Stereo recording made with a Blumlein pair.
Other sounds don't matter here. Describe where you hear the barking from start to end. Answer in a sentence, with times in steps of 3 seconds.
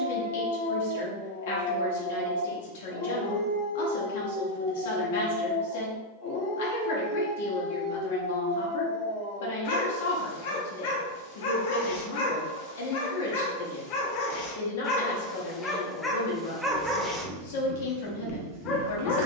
You can hear the barking on the left from 0 s, in the centre from 15 s and on the left from 18 s.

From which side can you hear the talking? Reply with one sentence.
In this clip you hear the talking on the left.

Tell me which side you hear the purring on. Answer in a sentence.
In this clip you hear the purring on the right.